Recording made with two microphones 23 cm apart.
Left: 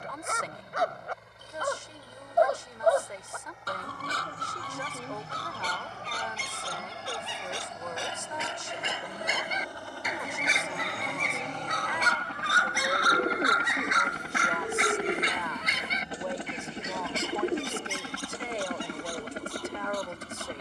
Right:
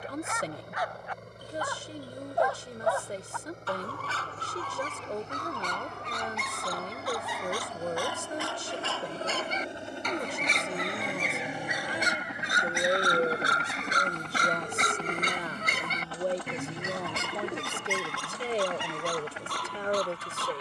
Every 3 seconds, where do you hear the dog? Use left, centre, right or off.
left, left, left, centre, right, right, right.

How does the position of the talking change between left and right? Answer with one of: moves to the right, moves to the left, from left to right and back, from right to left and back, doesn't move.
doesn't move.